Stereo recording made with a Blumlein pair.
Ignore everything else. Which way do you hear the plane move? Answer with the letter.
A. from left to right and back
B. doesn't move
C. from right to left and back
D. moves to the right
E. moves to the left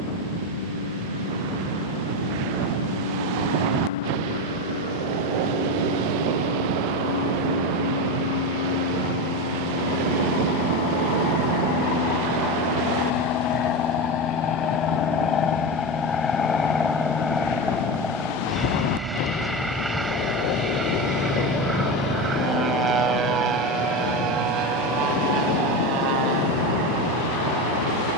D.